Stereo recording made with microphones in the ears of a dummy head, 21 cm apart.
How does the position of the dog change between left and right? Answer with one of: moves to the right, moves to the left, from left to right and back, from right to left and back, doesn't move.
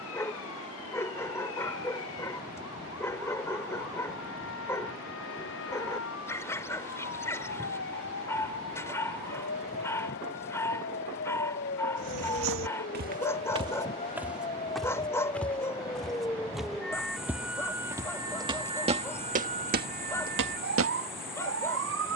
doesn't move.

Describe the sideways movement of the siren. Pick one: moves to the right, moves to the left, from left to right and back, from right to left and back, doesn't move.
moves to the right.